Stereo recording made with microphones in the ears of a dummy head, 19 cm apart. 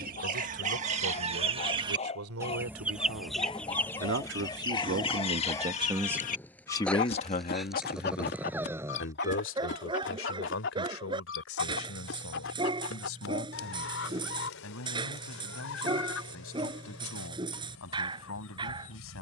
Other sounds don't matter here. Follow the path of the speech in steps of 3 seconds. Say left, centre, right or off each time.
right, right, left, left, left, left, left.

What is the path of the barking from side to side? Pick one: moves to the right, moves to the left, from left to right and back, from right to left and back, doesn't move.
moves to the right.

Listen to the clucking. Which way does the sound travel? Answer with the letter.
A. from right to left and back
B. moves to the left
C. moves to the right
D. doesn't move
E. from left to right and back
B.